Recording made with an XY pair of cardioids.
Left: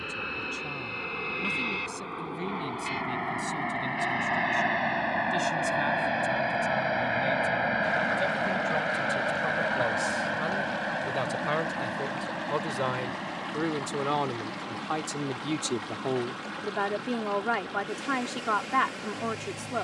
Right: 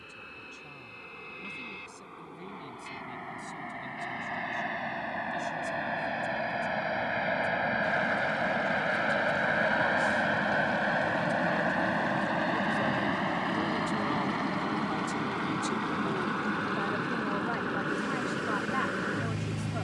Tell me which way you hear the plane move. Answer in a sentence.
In this clip you hear the plane move to the right.